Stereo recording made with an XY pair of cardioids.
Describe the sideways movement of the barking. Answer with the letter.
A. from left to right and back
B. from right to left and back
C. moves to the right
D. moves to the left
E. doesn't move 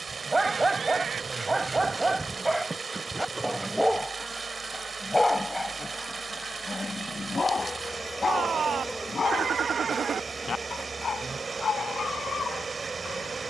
D.